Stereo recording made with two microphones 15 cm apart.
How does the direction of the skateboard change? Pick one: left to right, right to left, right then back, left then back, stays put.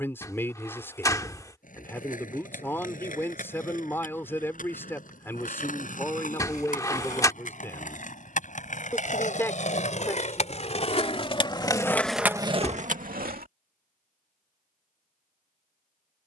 left to right.